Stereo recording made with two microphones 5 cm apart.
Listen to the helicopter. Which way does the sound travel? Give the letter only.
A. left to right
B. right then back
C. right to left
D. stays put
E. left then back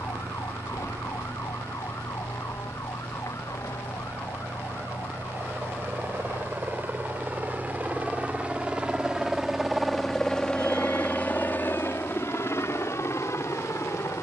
C.